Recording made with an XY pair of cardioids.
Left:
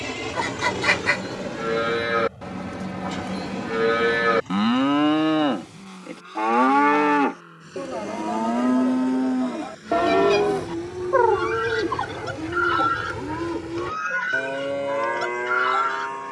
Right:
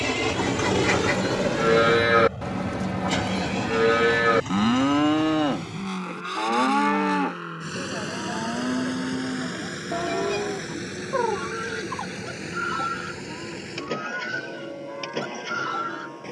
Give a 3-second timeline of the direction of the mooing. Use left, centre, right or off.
right, centre, left, left, left, left.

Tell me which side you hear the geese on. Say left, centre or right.
left.